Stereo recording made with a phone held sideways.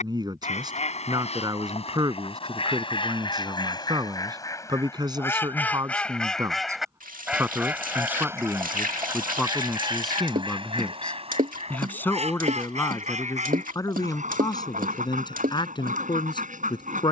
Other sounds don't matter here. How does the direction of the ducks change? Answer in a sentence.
You can hear the ducks move from left to right.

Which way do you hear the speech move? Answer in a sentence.
In this clip you hear the speech go from the right side to the left.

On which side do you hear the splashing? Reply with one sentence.
In this clip you hear the splashing on the right.